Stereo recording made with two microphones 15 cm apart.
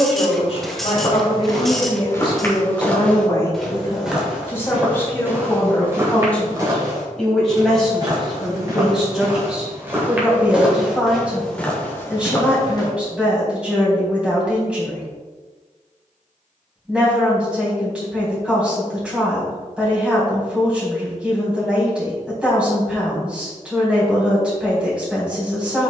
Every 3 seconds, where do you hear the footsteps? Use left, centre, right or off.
left, centre, right, centre, left, off, off, off, off.